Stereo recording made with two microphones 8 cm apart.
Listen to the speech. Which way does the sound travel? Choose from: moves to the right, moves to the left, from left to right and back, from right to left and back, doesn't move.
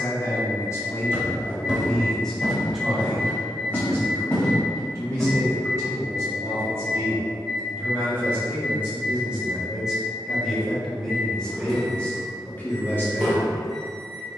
from left to right and back.